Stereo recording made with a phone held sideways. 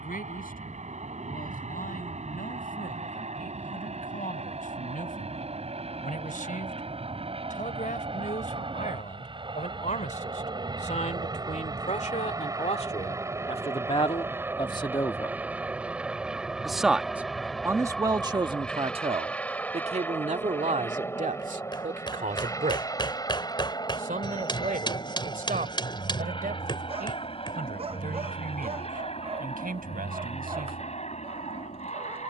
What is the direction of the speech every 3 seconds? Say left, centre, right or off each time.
left, left, left, left, left, centre, right, right, right, right, right.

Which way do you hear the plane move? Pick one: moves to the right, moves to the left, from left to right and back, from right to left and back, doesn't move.
moves to the left.